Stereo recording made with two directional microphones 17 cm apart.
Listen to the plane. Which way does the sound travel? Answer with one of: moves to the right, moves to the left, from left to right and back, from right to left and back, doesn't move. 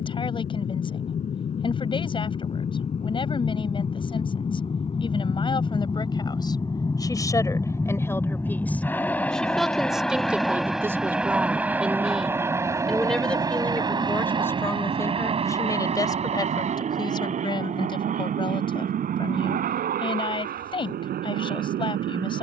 moves to the right.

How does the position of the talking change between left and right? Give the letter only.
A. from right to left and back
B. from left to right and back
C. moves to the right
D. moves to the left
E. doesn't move
B.